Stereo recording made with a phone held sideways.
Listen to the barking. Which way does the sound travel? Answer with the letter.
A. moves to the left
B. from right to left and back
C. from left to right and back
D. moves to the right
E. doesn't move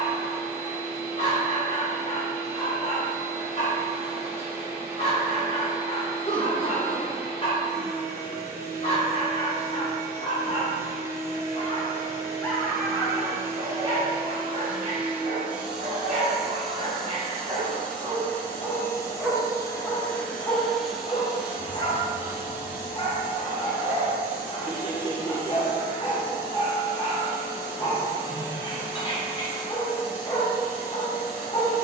C.